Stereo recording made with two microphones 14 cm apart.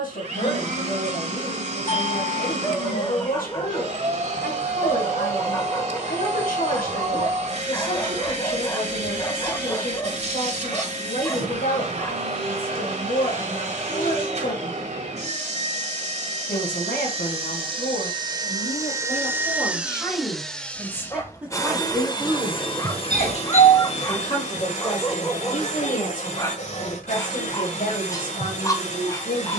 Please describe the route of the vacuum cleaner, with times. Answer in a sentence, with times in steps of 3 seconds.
In this clip you hear the vacuum cleaner on the right from 0 s, in the centre from 18 s and on the left from 21 s.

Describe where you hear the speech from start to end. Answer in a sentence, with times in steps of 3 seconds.
You can hear the speech on the left from 0 s, in the centre from 21 s and on the left from 24 s.